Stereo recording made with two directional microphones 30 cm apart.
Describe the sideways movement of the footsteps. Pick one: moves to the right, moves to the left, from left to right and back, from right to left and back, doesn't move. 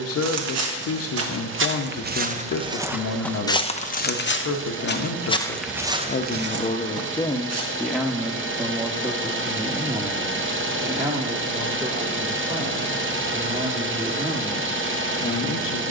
from right to left and back.